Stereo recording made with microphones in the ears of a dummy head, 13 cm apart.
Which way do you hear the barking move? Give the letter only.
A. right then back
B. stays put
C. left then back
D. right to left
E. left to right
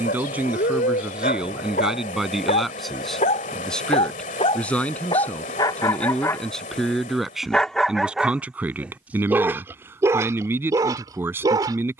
E.